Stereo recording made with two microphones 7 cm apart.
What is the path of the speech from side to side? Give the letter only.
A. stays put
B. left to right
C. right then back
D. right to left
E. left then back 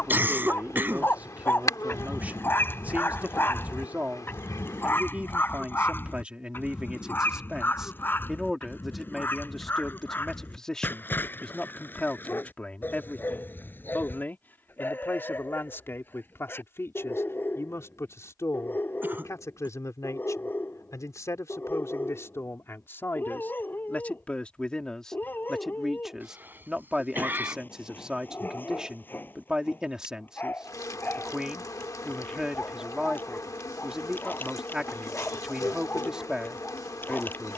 E.